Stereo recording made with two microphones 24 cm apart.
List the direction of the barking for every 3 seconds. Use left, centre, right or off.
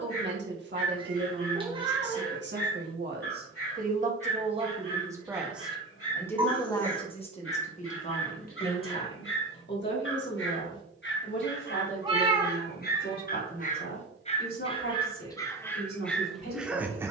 left, left, left, left, left, centre.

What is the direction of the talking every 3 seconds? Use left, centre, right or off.
right, right, left, left, left, left.